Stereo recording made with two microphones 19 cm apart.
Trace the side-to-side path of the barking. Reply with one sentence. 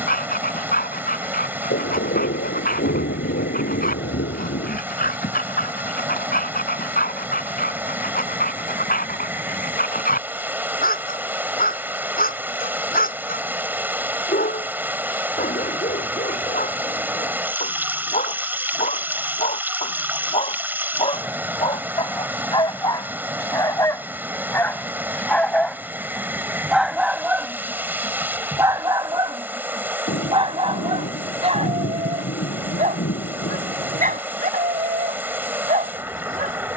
In this clip you hear the barking travel towards the right.